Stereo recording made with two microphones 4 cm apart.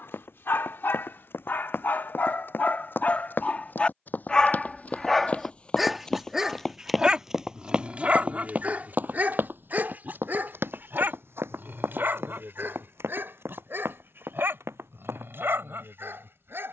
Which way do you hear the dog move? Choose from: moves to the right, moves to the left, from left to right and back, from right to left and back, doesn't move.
moves to the right.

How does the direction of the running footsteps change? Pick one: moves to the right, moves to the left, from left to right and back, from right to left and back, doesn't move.
moves to the right.